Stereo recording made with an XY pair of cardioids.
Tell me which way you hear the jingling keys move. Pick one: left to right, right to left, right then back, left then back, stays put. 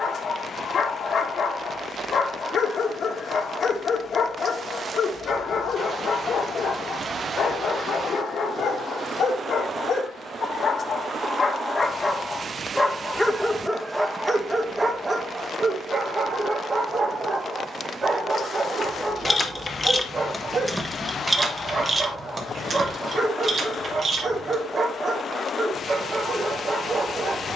left to right.